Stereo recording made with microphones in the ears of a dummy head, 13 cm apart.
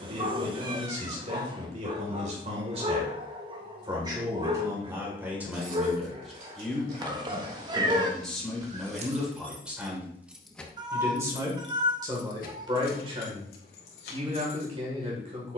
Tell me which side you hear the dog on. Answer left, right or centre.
right.